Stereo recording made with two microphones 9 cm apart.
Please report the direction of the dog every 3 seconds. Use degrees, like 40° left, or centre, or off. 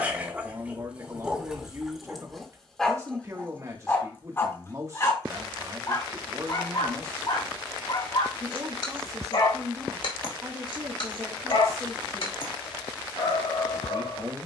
10° right, 30° left, 60° left, 70° left, 80° left.